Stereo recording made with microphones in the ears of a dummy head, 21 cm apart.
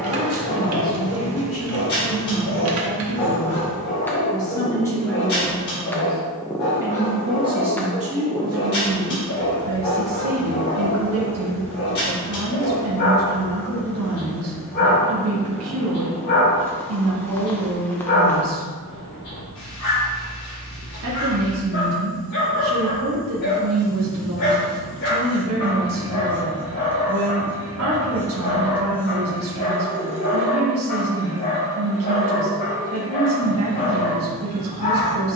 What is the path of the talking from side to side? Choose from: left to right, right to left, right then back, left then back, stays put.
left to right.